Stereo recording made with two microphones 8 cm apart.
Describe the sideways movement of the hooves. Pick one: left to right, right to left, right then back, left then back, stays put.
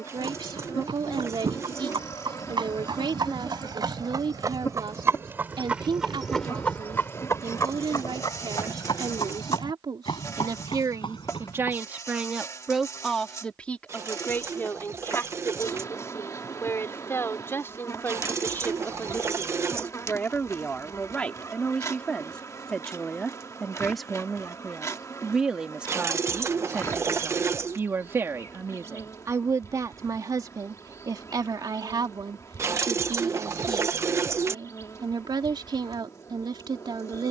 right to left.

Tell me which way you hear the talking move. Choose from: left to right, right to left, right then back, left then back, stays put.
left then back.